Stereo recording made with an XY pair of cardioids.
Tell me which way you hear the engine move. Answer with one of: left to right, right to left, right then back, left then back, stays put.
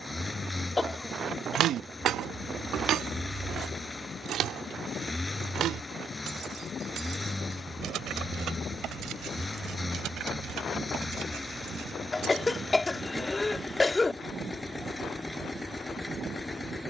stays put.